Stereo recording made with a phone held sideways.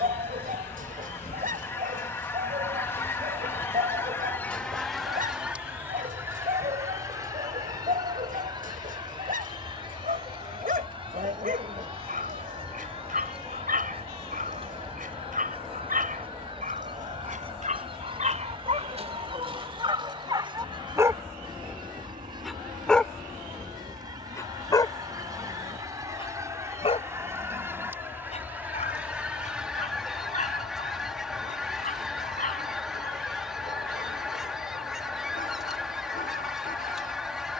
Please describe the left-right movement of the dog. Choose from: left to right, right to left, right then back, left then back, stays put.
right to left.